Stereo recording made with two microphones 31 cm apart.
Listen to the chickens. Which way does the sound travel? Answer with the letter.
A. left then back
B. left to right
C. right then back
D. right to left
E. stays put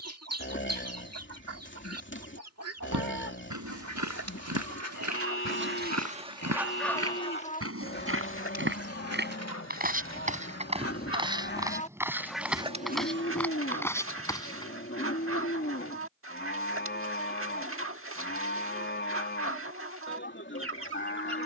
A.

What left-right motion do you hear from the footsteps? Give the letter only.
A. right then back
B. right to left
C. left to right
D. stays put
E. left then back
B.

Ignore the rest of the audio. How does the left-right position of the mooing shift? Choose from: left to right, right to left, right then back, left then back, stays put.
stays put.